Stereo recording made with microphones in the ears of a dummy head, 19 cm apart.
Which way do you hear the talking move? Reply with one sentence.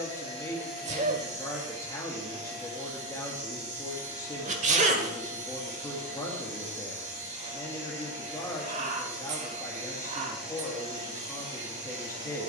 In this clip you hear the talking stay in one place.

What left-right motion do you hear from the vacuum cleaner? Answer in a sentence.
In this clip you hear the vacuum cleaner stay in one place.